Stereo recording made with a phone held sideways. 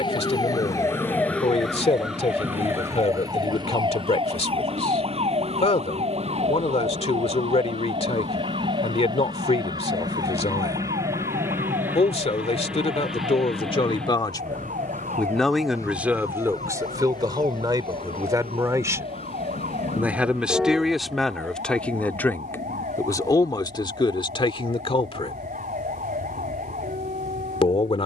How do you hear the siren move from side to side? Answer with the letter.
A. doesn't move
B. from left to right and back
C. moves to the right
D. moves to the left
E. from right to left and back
C.